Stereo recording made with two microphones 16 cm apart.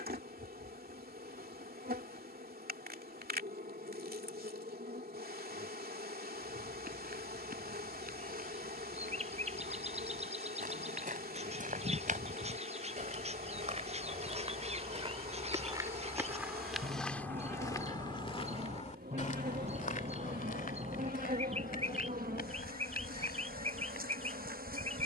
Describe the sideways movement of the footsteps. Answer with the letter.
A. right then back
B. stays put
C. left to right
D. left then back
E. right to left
E.